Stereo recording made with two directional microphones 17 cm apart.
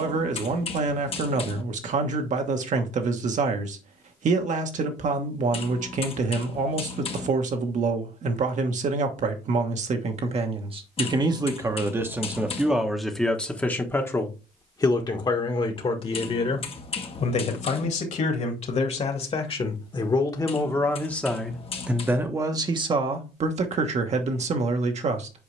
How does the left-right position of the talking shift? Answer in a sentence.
In this clip you hear the talking move from right to left and back again.